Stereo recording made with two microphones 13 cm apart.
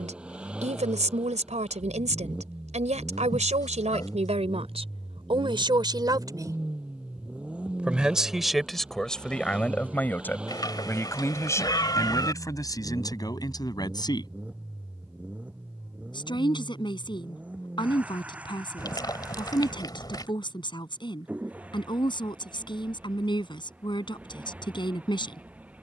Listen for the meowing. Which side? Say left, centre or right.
left.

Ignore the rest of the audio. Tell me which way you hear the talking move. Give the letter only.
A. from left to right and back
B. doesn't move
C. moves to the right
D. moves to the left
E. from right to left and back
D.